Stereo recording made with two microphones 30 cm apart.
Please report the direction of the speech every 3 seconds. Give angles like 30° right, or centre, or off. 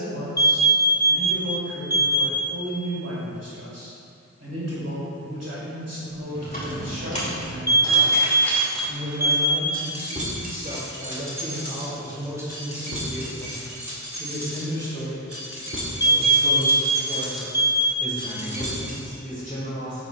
60° right, 60° right, 60° right, 30° right, centre, 20° left, 30° left.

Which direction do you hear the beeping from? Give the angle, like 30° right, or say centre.
70° left.